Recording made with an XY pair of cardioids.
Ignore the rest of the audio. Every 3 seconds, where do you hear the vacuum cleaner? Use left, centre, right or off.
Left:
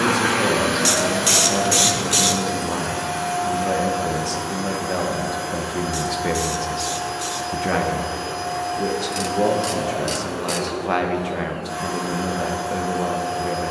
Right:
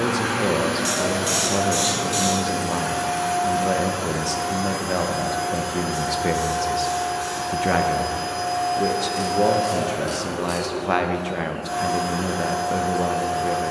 centre, right, right, right, right.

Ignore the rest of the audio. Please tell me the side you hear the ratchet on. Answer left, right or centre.
left.